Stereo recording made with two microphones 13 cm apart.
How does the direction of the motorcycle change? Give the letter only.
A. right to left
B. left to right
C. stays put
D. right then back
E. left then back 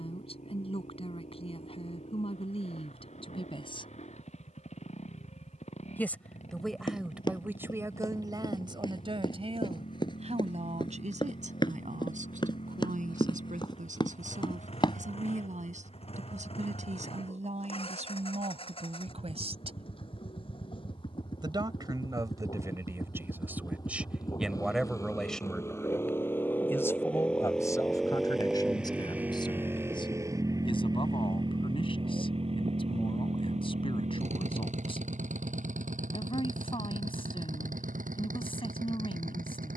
B.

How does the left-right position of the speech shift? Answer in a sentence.
In this clip you hear the speech move from left to right and back again.